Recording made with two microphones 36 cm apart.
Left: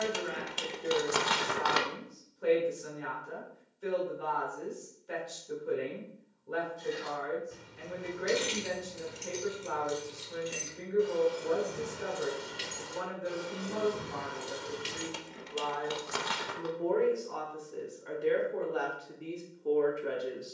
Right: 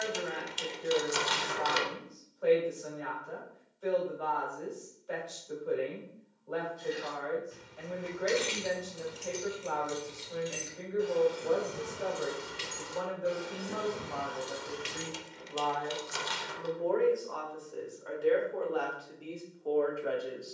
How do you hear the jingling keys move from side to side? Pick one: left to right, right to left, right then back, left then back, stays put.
right then back.